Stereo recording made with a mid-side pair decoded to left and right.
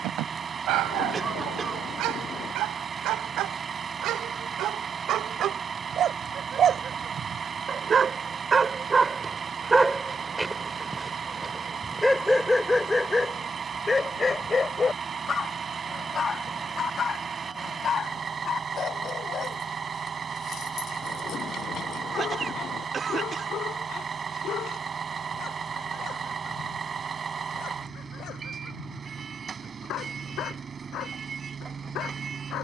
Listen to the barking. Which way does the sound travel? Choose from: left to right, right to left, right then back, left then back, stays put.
right to left.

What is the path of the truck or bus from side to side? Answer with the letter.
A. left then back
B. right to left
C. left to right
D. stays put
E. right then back
D.